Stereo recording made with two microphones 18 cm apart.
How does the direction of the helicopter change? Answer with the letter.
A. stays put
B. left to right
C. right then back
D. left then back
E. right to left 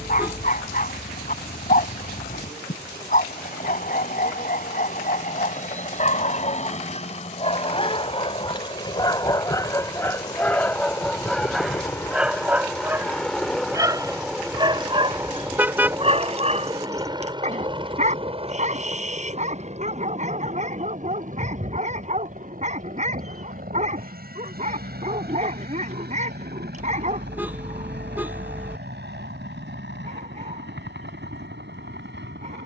B.